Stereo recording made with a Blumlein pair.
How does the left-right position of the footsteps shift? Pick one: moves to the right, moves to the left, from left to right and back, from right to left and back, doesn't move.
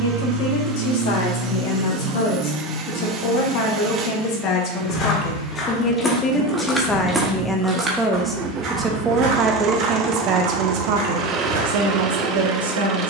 moves to the right.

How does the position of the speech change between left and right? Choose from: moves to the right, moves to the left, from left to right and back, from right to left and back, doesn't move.
moves to the right.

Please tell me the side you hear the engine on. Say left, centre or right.
right.